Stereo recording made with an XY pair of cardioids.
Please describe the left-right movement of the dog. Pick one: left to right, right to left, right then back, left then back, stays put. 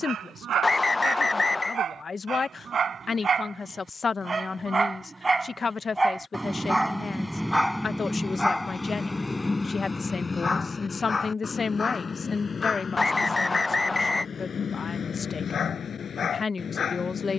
right to left.